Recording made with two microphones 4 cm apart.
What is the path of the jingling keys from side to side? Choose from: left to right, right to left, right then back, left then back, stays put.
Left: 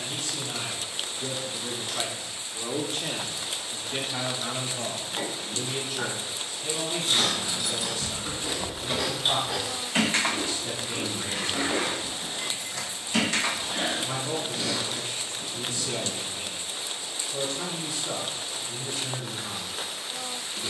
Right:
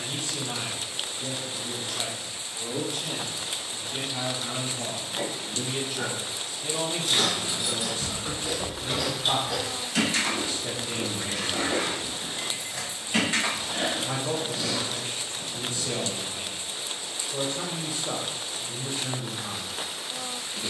left then back.